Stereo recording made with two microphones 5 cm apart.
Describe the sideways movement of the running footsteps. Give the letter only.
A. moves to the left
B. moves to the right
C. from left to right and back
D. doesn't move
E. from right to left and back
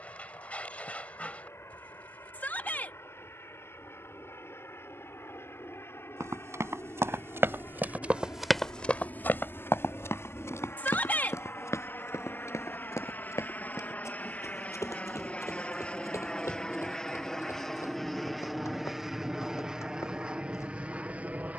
A.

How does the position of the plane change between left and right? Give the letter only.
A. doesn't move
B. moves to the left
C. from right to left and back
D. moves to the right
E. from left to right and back
D.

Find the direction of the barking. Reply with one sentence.
In this clip you hear the barking on the left.